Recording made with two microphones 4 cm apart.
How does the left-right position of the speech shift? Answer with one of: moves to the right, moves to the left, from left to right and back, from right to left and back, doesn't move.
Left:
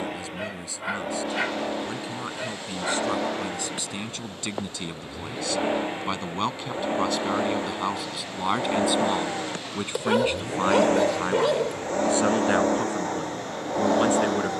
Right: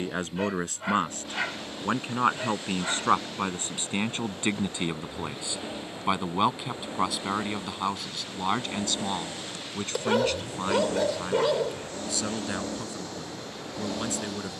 moves to the left.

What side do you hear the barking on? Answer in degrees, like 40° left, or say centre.
10° left.